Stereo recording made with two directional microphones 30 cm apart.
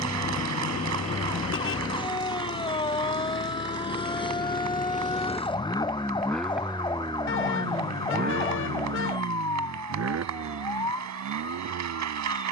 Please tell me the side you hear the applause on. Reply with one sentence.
In this clip you hear the applause on the right.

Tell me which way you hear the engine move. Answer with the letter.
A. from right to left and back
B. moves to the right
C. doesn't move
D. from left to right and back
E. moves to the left
B.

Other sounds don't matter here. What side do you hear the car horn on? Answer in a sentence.
In this clip you hear the car horn on the left.